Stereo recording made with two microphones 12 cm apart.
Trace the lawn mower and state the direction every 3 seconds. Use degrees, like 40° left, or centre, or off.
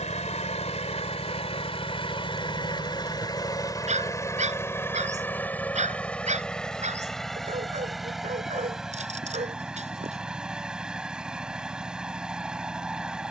60° left, 20° left, centre, 10° right, 10° right.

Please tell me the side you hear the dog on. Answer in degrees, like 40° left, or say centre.
80° right.